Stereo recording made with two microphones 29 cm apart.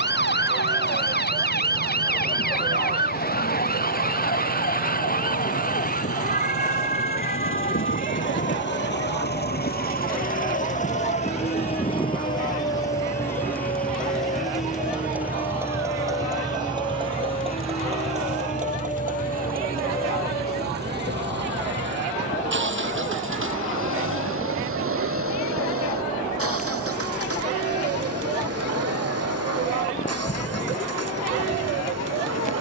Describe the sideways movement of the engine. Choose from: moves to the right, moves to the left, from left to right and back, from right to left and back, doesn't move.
moves to the right.